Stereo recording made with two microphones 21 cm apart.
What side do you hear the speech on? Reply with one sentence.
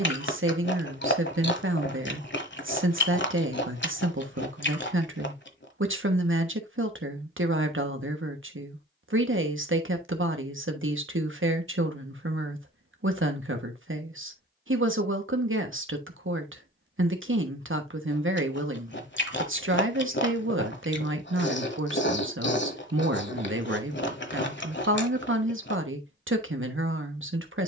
You can hear the speech on the right.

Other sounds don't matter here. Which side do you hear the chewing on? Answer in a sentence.
In this clip you hear the chewing on the left.